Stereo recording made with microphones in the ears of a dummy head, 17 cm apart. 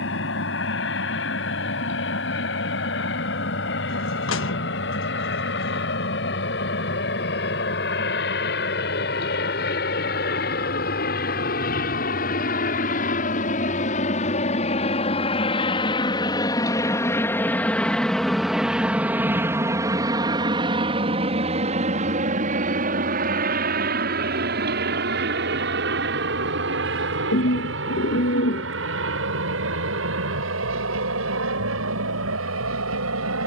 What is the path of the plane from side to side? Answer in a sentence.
In this clip you hear the plane go from the left side to the right.